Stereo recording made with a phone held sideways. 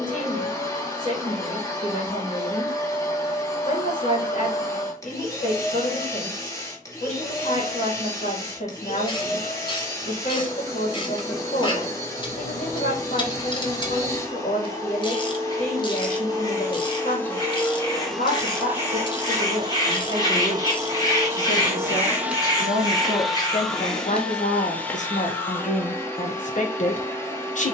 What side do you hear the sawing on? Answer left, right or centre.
left.